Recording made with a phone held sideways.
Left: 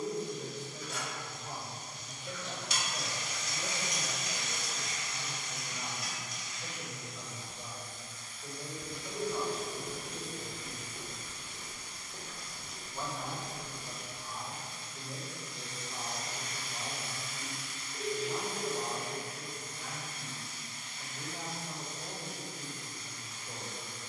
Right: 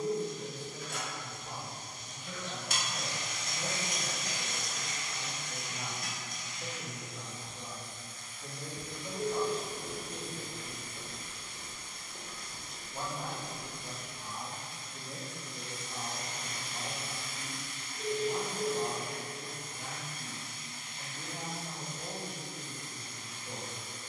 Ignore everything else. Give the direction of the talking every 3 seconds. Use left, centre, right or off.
left, centre, right, right, right, right, right, right.